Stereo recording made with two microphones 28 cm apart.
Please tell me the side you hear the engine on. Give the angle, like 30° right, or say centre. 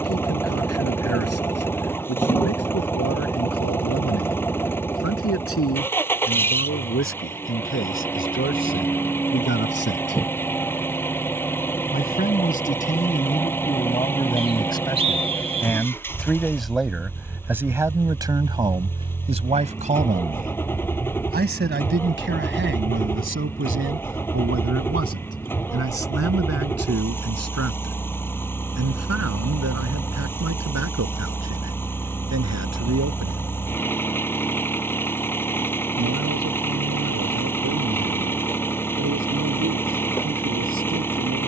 10° left.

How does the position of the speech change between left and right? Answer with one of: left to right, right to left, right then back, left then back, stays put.
left to right.